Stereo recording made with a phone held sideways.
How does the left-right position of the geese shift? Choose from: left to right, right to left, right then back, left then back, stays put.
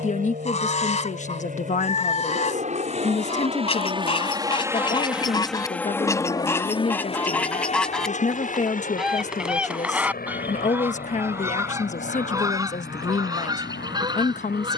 left to right.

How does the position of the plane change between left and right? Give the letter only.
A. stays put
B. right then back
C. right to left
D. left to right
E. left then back
C.